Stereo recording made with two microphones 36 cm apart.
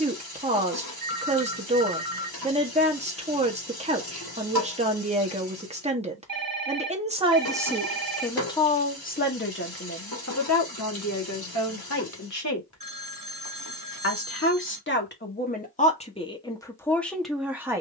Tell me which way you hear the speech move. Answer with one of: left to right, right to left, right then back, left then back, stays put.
left then back.